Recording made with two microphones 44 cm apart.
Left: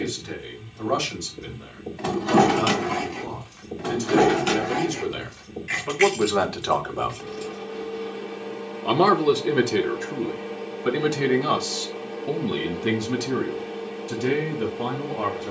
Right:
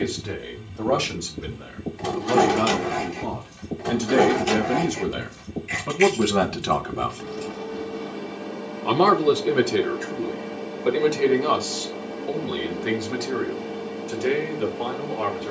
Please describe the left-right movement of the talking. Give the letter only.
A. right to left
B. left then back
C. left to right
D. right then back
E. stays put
A.